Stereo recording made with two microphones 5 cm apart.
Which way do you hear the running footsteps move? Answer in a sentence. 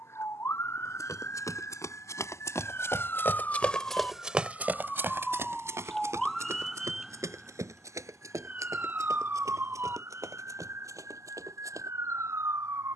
You can hear the running footsteps travel towards the right.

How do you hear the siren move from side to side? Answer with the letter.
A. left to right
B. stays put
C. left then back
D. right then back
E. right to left
A.